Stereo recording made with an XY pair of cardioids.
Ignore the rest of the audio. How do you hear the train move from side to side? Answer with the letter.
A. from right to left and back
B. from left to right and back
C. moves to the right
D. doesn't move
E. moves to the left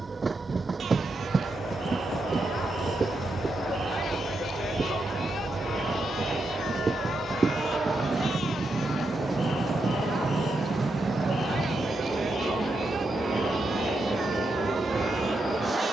D.